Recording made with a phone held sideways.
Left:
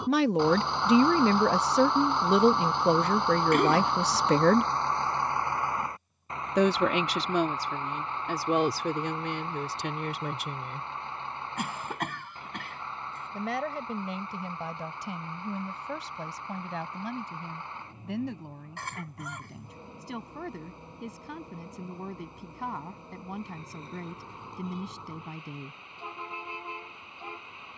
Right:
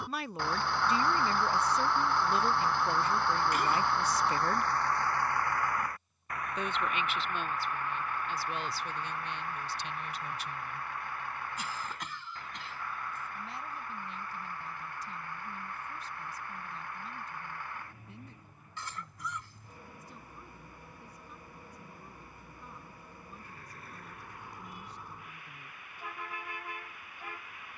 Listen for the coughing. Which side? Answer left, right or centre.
left.